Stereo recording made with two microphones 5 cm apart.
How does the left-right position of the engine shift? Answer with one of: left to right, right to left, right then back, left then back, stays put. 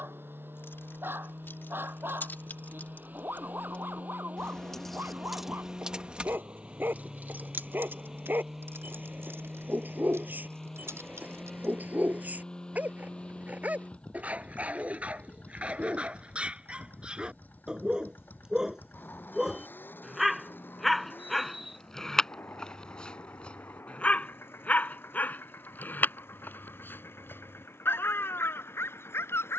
right to left.